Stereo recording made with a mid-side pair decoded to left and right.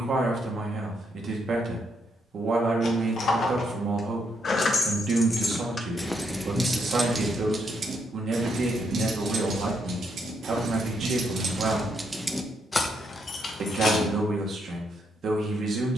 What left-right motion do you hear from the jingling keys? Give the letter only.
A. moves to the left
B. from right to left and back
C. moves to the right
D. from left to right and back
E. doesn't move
D.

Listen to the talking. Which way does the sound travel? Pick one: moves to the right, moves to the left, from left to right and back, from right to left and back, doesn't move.
doesn't move.